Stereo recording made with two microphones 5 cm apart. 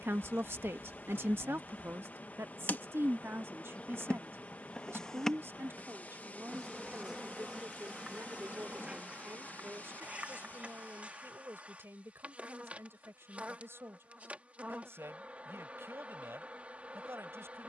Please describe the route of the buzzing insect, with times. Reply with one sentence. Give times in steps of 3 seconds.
In this clip you hear the buzzing insect on the left from 0 s, in the centre from 6 s and on the right from 9 s.